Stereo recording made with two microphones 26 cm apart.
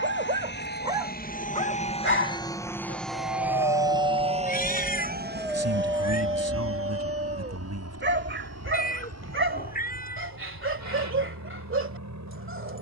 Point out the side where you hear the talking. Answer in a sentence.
You can hear the talking on the right.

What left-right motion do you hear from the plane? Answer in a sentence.
In this clip you hear the plane move from left to right.